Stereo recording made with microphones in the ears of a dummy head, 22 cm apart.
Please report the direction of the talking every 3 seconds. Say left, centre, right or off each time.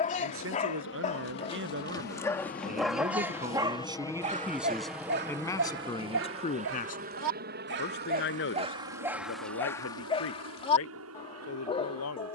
right, centre, left, left.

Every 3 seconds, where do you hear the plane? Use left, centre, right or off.
left, centre, right, right.